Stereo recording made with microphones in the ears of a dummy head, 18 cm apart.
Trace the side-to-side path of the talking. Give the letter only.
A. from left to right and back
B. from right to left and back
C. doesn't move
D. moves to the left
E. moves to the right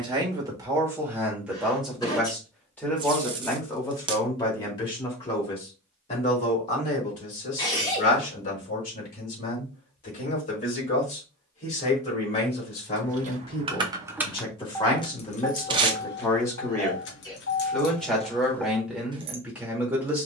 B.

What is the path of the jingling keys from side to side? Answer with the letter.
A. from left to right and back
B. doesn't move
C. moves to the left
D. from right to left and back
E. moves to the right
D.